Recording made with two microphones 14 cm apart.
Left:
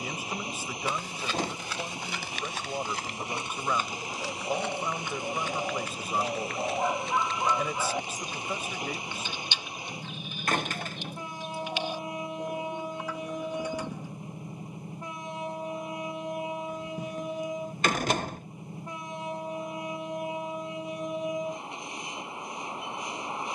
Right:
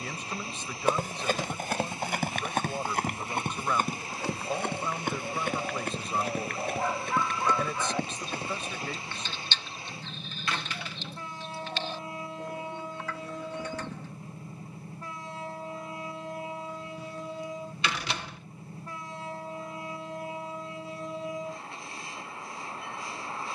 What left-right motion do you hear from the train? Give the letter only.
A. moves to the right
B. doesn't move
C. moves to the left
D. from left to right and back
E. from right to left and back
B.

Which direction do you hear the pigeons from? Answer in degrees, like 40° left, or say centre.
10° left.